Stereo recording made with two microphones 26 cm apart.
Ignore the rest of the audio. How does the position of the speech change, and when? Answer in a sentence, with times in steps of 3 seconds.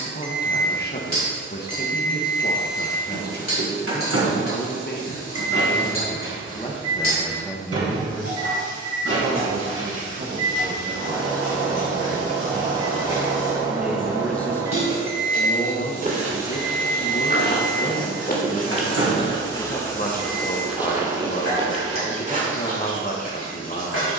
You can hear the speech on the left from 0 s, in the centre from 6 s, on the right from 9 s, in the centre from 12 s and on the left from 15 s.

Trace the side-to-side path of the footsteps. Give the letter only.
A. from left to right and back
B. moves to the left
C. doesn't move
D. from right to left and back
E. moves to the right
D.